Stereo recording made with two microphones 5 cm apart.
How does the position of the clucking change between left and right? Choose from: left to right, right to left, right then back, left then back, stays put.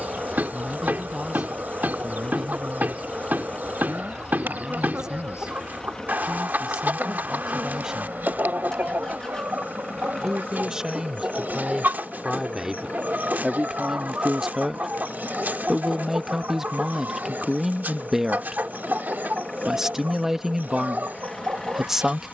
stays put.